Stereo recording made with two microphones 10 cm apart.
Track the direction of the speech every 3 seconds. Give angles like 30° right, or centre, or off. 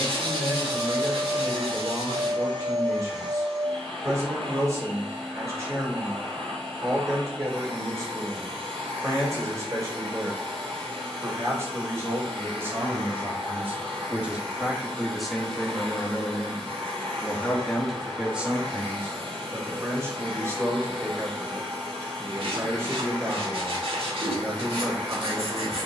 30° right, 30° right, 30° right, 30° right, 20° right, 10° left, 20° right, 30° right, 30° right.